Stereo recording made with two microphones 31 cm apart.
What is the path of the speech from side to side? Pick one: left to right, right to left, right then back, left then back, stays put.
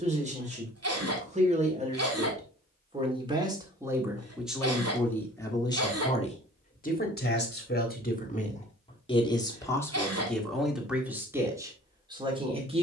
left then back.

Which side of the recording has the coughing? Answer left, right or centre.
right.